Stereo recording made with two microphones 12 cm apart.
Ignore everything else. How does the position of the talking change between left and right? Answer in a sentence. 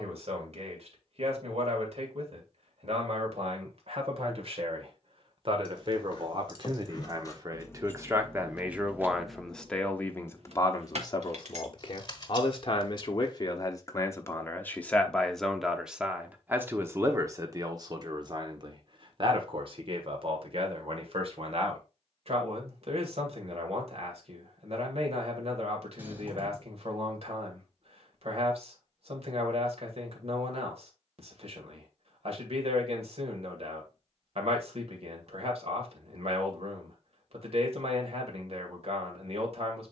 You can hear the talking go left and come back.